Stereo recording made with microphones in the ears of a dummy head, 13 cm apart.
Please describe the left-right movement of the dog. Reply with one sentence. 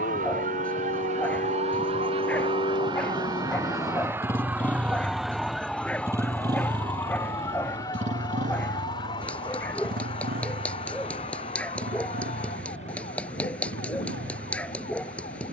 You can hear the dog stay in one place.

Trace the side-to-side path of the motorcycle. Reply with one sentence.
In this clip you hear the motorcycle travel towards the right.